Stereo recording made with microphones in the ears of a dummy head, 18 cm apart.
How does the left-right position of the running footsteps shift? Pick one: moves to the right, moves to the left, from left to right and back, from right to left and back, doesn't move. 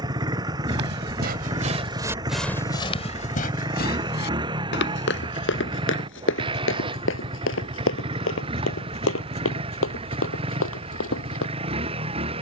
moves to the left.